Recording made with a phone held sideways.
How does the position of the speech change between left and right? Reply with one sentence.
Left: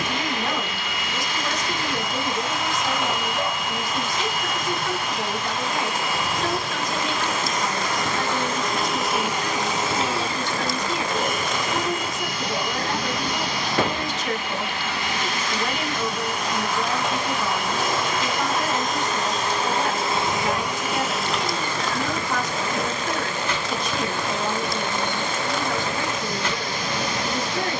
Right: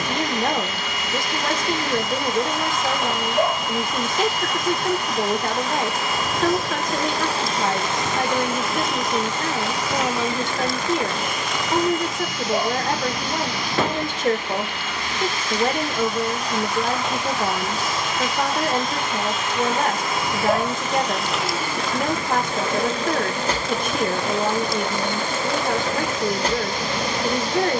In this clip you hear the speech stay put.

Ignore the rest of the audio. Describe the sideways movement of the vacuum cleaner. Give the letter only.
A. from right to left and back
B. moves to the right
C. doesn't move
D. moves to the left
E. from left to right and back
A.